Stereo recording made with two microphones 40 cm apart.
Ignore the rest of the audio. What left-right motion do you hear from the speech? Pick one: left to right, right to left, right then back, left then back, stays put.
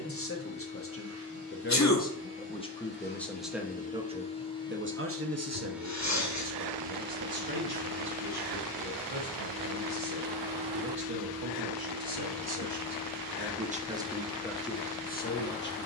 right then back.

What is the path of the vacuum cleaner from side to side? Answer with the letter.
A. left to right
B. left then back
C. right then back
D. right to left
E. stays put
C.